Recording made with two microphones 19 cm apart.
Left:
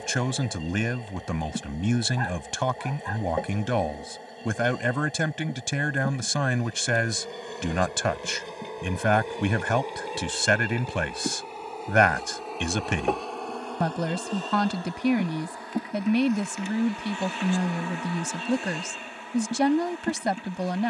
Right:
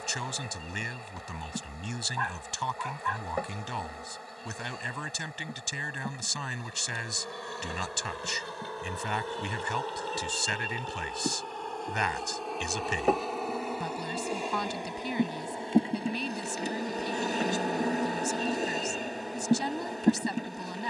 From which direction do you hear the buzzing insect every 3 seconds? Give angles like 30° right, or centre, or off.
30° left, 20° left, 20° left, 10° left, centre, 30° right, 40° right.